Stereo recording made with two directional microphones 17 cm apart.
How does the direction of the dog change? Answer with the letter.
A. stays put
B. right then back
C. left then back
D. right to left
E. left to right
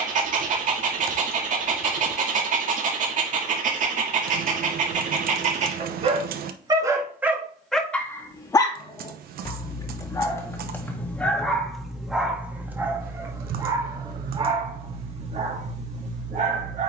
C.